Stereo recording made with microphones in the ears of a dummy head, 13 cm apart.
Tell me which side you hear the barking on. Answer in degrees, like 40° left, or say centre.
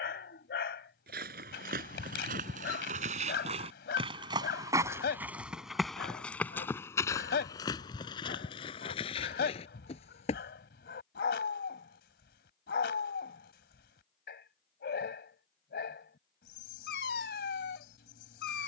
80° left.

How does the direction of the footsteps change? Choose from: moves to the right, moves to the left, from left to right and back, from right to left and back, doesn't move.
moves to the left.